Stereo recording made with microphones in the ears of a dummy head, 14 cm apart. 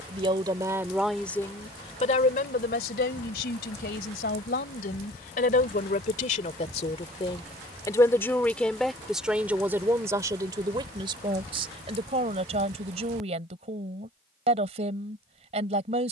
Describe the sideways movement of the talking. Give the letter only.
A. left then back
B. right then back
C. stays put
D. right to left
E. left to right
A.